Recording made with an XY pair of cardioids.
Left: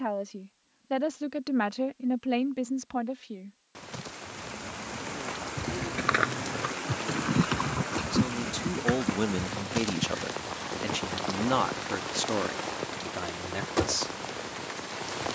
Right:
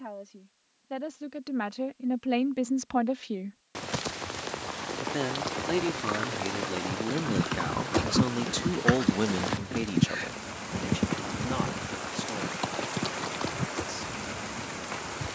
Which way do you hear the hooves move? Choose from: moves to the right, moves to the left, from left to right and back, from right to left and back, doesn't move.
moves to the right.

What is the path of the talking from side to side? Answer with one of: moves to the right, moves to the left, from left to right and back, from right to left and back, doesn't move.
from left to right and back.